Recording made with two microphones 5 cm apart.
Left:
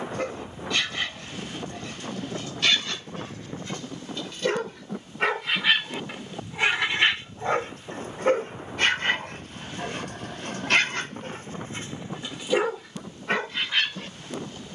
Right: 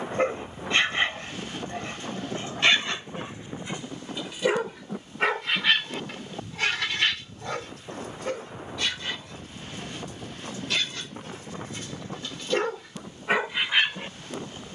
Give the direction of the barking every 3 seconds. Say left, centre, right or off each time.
right, centre, left, left, centre.